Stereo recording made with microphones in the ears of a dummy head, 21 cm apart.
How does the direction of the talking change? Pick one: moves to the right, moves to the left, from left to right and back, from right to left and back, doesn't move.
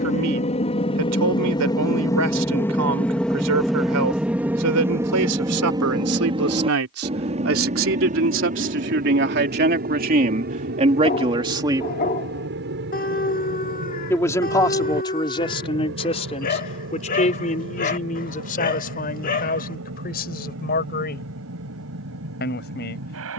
moves to the left.